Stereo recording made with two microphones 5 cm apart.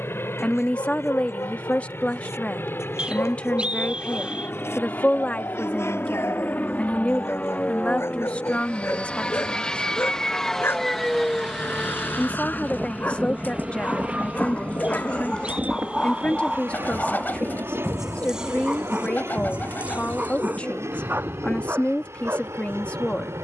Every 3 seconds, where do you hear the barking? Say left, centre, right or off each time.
left, left, left, left, left, centre, right, right.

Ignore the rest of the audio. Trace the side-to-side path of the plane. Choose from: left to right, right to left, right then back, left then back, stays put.
left to right.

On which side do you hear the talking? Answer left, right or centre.
left.